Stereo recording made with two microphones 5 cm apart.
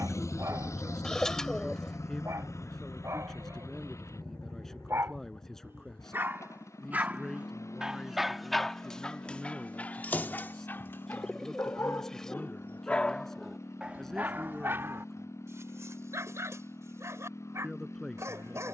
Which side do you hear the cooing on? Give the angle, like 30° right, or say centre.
10° left.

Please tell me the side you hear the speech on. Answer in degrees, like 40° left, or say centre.
10° left.